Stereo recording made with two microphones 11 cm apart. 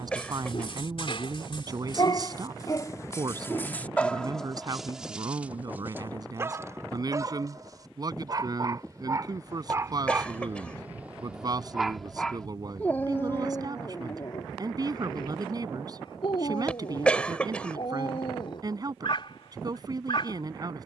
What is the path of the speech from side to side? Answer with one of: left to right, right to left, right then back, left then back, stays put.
stays put.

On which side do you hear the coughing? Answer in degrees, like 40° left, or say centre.
10° left.